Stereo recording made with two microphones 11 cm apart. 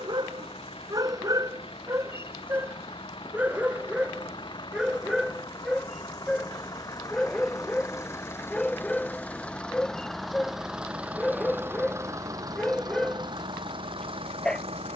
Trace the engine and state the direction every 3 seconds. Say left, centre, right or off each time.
left, left, left, centre, right.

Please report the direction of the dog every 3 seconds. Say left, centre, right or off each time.
right, centre, centre, centre, centre.